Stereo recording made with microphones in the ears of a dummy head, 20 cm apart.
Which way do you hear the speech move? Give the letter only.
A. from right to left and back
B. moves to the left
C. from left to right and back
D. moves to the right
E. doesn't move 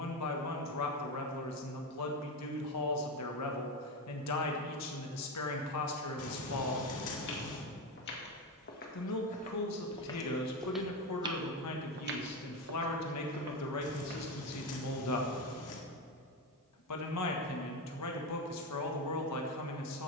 E.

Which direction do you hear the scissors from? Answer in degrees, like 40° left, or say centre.
70° left.